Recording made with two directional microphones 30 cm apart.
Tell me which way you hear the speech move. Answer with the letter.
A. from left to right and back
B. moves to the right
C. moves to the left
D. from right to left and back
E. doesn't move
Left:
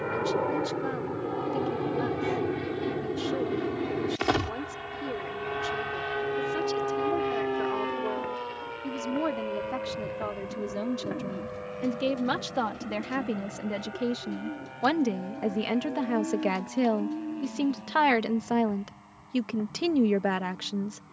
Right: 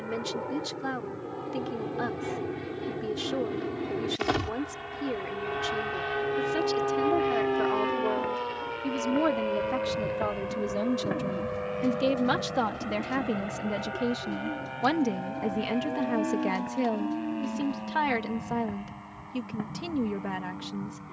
C.